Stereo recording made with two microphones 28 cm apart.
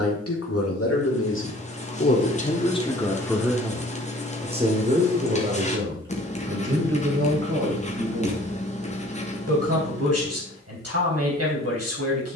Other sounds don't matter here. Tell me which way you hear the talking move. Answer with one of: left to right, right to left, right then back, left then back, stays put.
left to right.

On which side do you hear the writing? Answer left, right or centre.
left.